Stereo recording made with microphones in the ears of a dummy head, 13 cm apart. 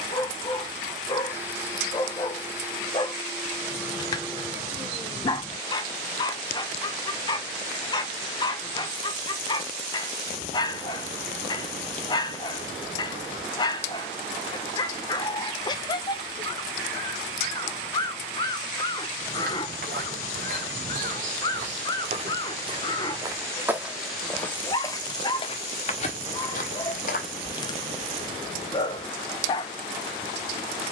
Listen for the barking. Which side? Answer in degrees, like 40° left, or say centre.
30° left.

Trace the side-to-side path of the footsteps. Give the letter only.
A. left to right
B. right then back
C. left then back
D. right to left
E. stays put
D.